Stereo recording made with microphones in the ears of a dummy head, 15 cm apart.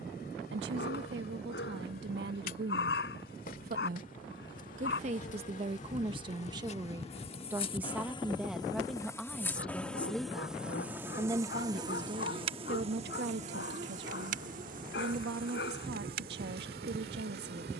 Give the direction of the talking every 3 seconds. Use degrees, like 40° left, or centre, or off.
70° right, 40° right, 10° right, 10° right, 60° right, 70° right.